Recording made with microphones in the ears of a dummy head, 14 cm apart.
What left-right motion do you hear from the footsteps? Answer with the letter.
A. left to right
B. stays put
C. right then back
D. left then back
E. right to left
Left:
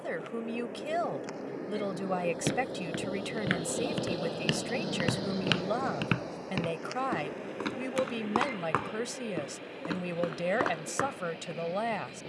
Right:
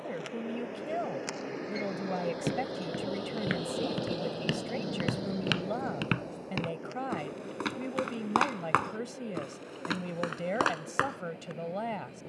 A.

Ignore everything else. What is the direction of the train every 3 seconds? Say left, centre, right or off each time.
right, centre, left, left.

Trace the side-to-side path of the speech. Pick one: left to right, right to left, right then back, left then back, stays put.
stays put.